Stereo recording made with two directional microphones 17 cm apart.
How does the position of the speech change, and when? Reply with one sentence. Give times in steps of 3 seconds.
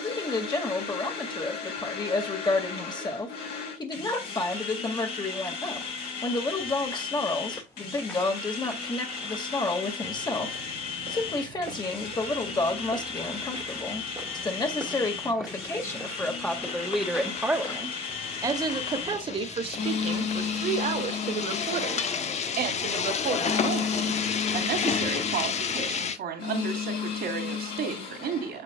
You can hear the speech on the left from 0 s, in the centre from 15 s and on the right from 18 s.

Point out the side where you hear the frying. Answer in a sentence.
You can hear the frying on the left.